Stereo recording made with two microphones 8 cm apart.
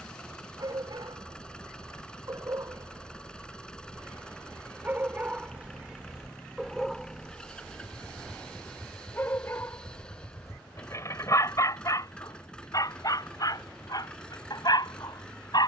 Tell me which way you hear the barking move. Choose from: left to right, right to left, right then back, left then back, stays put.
right to left.